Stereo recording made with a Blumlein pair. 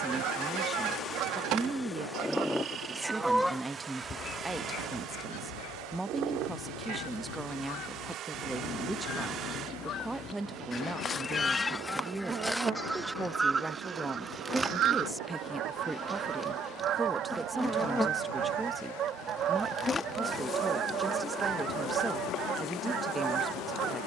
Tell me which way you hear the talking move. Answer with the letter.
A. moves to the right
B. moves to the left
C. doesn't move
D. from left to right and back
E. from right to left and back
C.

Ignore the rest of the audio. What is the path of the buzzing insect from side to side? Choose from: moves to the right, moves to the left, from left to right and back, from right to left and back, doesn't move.
from left to right and back.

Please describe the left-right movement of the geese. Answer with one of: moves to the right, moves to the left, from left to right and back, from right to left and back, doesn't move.
from right to left and back.